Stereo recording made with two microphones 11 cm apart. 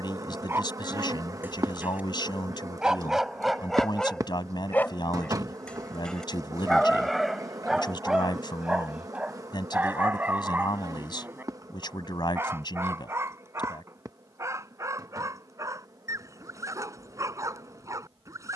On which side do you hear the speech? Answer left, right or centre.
left.